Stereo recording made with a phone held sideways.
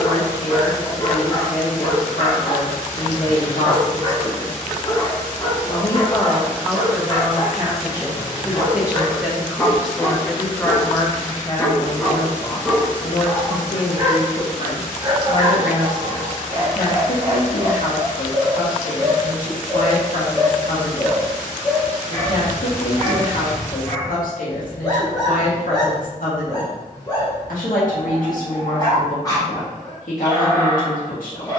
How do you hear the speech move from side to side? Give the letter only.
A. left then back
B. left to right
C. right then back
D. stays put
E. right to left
C.